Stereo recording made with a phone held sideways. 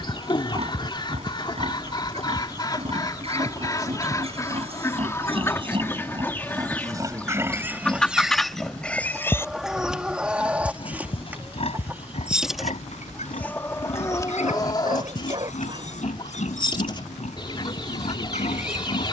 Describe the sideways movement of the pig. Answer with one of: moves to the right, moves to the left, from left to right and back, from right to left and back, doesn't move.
moves to the left.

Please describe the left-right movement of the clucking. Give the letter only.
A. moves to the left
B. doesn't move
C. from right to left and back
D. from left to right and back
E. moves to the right
D.